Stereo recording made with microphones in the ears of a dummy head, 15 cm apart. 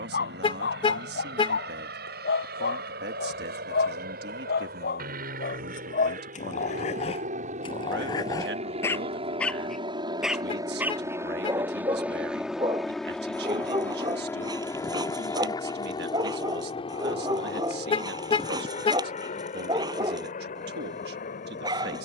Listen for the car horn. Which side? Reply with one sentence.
In this clip you hear the car horn on the left.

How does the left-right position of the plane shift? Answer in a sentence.
You can hear the plane go from the right side to the left.